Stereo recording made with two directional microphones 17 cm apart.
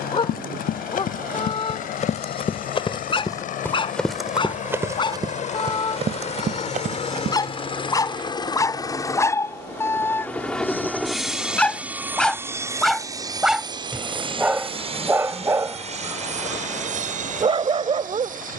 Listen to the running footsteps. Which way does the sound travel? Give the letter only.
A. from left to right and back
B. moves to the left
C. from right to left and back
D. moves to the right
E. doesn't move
D.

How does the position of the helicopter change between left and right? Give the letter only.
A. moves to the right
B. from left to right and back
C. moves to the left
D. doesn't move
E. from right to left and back
A.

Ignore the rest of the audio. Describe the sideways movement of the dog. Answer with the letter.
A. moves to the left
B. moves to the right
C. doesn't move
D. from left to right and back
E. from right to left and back
B.